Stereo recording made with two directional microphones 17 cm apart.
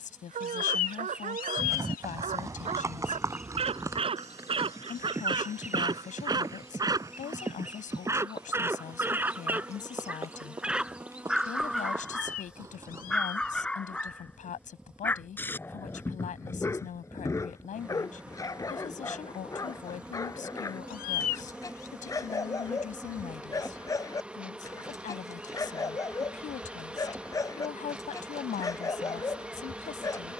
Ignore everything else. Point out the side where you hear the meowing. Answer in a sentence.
In this clip you hear the meowing on the left.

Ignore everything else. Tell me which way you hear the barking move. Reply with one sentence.
In this clip you hear the barking travel towards the left.